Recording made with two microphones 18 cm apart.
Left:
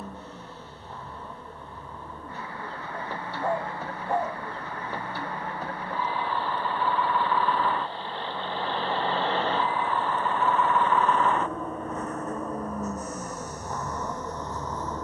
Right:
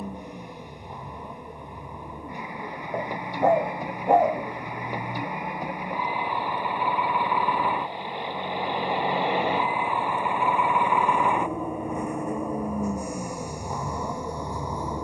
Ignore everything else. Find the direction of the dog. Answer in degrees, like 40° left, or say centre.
70° right.